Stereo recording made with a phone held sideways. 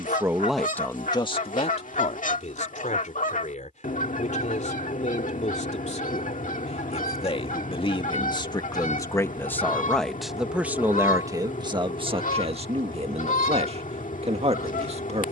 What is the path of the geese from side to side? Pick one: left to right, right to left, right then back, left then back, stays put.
stays put.